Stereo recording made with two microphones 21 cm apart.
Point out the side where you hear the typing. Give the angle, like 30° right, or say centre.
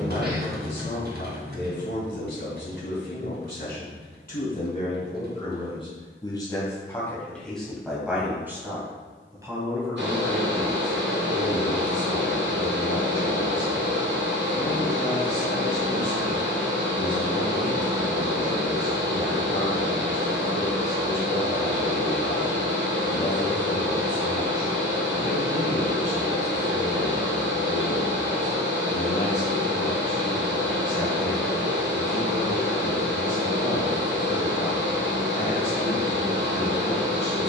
50° right.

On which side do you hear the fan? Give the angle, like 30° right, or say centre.
60° right.